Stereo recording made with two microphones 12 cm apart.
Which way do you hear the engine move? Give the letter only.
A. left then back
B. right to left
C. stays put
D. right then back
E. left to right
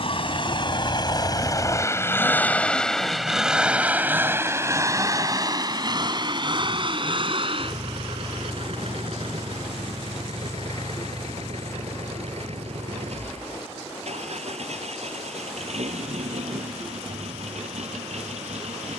E.